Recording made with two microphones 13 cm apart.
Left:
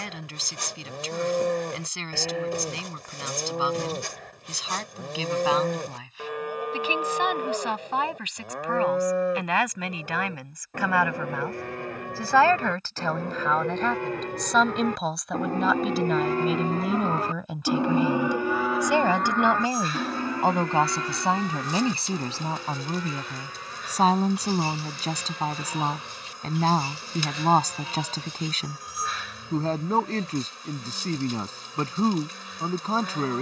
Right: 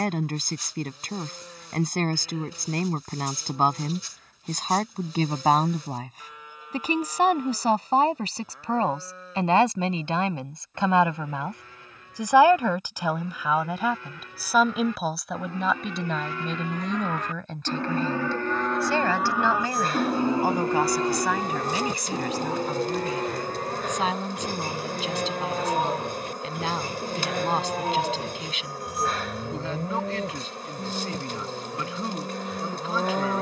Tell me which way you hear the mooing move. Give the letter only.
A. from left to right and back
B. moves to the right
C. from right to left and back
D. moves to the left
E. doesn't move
B.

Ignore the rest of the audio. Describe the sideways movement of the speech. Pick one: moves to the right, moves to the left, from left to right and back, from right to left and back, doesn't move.
moves to the left.